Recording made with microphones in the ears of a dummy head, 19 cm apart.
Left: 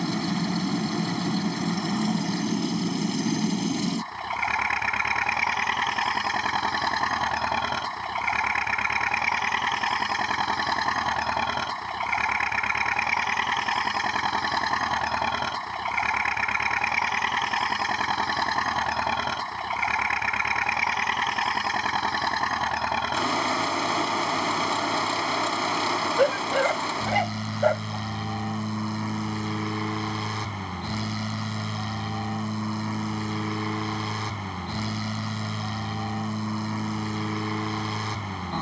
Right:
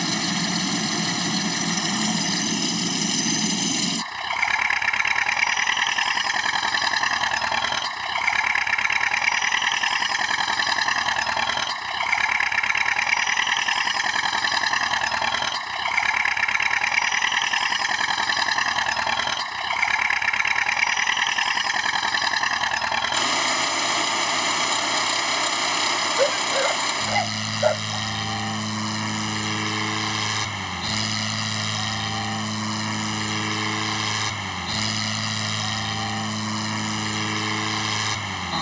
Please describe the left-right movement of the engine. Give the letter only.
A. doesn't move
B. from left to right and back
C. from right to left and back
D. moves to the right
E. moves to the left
A.